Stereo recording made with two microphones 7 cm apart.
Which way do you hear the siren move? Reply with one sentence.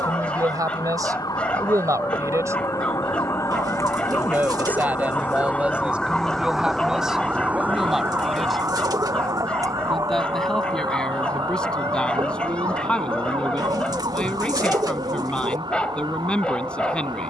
You can hear the siren travel towards the right.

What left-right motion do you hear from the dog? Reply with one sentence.
In this clip you hear the dog stay put.